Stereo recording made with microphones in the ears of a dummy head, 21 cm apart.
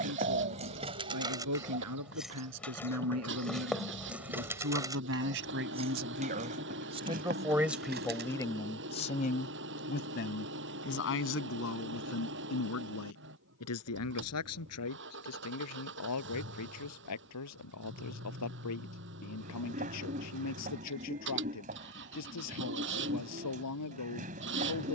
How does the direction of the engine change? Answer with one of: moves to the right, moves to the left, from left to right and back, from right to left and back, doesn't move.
doesn't move.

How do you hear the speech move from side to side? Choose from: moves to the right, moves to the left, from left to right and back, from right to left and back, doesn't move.
moves to the left.